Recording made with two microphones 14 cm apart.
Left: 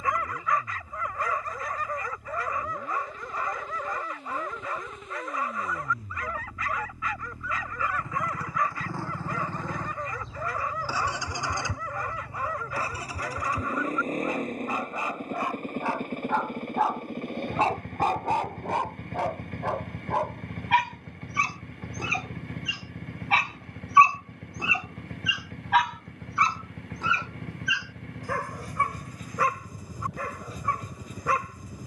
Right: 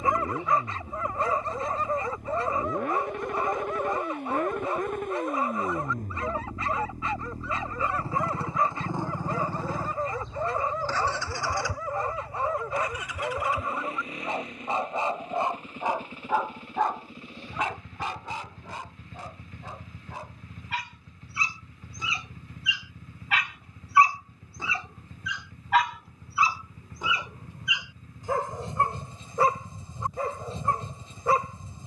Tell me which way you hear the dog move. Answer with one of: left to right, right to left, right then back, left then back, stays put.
left then back.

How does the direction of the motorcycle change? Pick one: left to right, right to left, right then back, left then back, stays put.
right to left.